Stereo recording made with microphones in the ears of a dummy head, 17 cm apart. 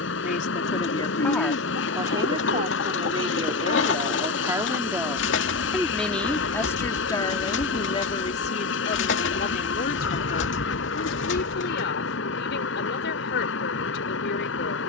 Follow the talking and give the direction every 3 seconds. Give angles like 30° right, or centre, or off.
centre, 20° right, 20° left, 50° left, 60° left.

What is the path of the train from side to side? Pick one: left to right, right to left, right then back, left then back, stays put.
stays put.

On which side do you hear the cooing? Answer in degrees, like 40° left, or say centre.
60° left.